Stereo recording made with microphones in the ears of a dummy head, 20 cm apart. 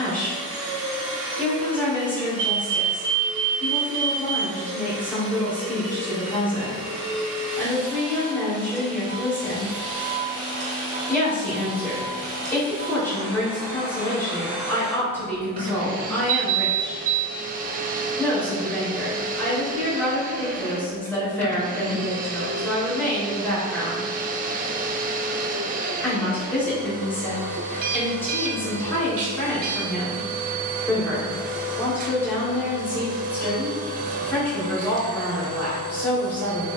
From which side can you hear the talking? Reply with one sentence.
In this clip you hear the talking in the centre.